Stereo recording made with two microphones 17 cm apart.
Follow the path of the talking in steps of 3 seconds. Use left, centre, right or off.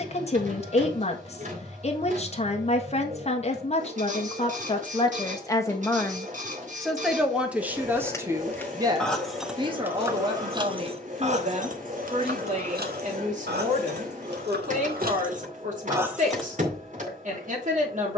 left, left, centre, right, right, right.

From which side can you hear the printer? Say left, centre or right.
right.